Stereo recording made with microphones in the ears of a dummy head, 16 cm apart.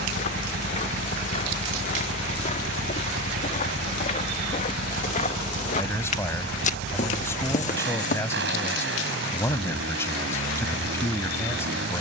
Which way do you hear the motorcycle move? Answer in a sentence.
You can hear the motorcycle stay in one place.